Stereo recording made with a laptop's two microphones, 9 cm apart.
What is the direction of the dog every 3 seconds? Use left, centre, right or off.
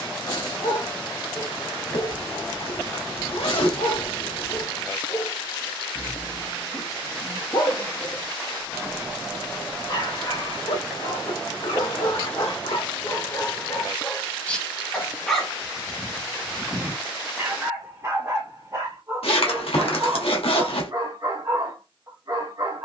left, left, left, left, left, centre, right, right.